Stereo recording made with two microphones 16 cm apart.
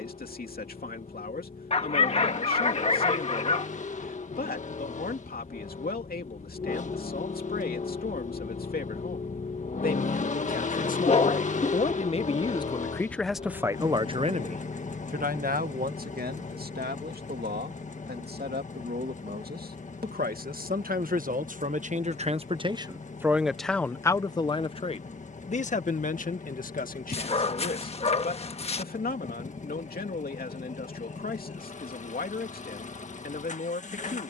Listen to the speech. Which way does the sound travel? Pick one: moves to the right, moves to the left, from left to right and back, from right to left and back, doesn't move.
from left to right and back.